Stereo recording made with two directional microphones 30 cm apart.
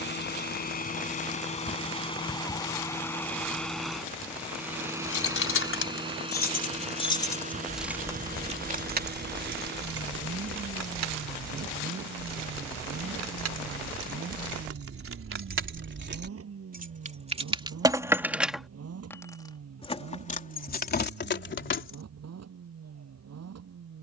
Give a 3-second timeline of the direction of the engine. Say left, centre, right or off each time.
left, centre, right, right, right, right, right, right.